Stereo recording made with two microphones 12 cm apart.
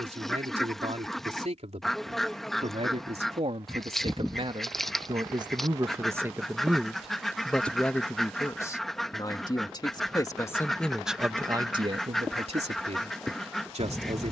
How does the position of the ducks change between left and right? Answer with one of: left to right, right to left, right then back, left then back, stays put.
stays put.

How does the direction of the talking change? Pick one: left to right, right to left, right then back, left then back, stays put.
left then back.